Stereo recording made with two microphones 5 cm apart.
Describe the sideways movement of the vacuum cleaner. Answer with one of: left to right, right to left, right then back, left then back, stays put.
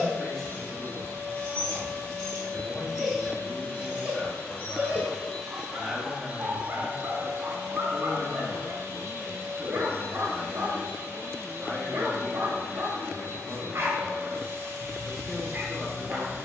left to right.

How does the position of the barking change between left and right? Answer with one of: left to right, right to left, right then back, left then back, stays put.
left to right.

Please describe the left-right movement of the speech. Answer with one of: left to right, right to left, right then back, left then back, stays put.
stays put.